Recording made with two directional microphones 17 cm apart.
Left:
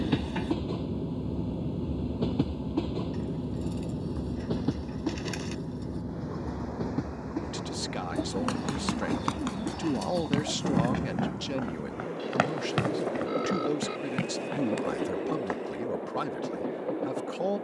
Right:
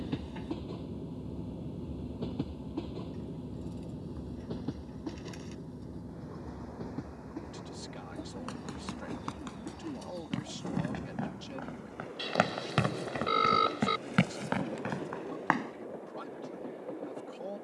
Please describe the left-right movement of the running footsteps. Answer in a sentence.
You can hear the running footsteps go from the left side to the right.